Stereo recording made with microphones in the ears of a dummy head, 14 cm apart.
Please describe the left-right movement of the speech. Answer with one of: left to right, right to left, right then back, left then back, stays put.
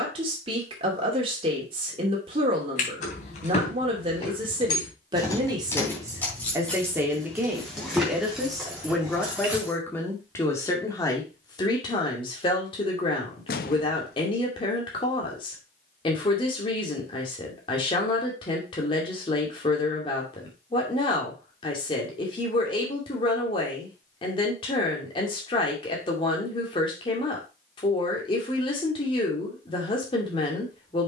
right to left.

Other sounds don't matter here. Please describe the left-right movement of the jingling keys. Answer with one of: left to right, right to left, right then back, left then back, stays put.
left to right.